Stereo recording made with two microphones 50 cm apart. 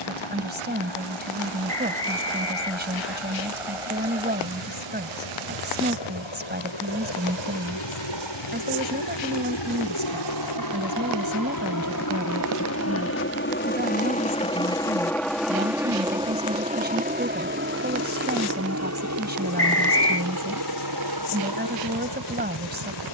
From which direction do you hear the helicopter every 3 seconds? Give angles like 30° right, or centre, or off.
80° left, 70° left, 60° left, 50° left, 20° left, 10° right, 30° right, 50° right.